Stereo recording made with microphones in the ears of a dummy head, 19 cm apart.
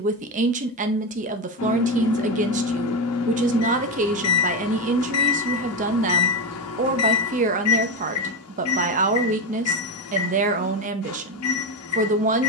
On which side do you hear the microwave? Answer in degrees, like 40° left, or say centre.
80° left.